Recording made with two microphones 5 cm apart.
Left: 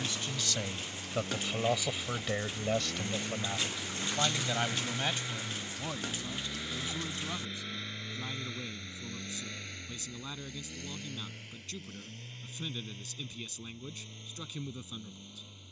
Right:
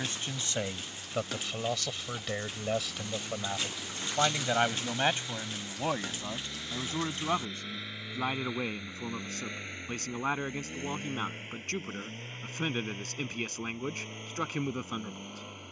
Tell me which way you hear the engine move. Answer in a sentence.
In this clip you hear the engine move to the right.